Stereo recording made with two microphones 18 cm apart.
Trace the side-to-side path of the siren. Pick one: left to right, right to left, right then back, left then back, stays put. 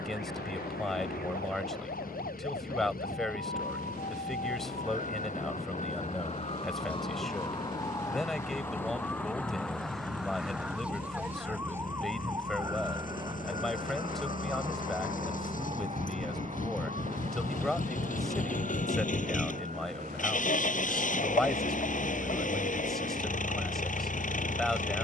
left to right.